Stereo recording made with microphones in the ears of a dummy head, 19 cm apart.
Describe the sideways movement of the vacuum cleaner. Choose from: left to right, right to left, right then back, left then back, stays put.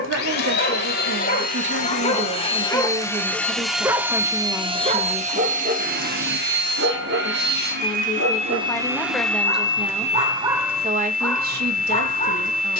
right then back.